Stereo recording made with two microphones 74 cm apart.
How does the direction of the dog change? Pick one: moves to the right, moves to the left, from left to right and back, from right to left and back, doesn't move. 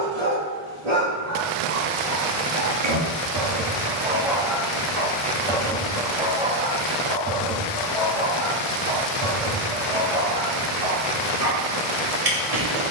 from right to left and back.